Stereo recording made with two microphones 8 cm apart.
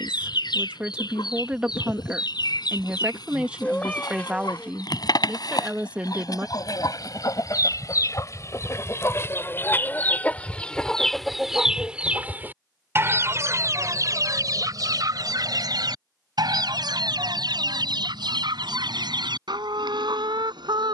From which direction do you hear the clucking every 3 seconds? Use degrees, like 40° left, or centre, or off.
70° left, 60° left, 50° left, 20° left, 40° right, 70° right, 80° right.